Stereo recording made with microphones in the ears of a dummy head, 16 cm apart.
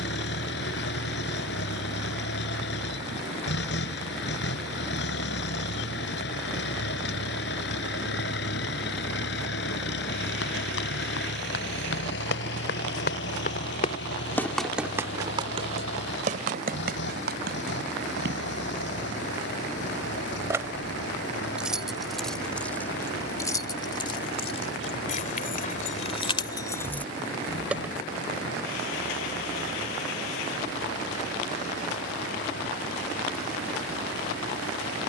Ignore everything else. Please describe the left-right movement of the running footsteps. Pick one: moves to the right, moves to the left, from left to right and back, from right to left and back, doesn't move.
moves to the right.